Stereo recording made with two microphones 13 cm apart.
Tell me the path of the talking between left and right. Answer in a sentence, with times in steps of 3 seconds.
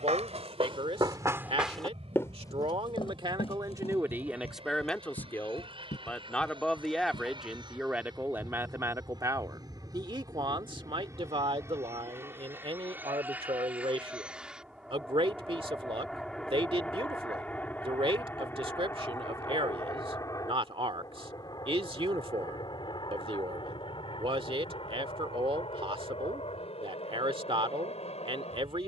In this clip you hear the talking on the right from 0 s, in the centre from 3 s and on the right from 9 s.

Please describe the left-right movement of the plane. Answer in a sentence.
You can hear the plane move from right to left.